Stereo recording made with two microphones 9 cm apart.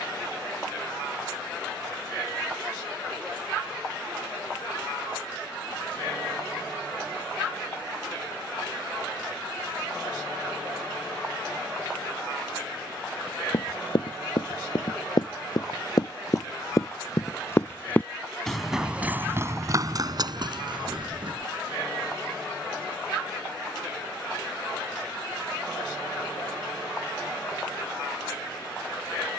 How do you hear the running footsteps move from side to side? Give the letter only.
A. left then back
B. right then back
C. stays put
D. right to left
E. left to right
E.